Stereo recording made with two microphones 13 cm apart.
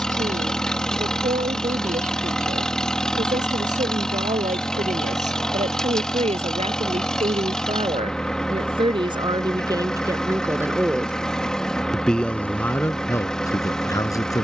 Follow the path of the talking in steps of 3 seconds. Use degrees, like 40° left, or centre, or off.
70° right, 70° right, 50° right, 20° right, 20° left.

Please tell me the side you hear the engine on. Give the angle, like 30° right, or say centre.
centre.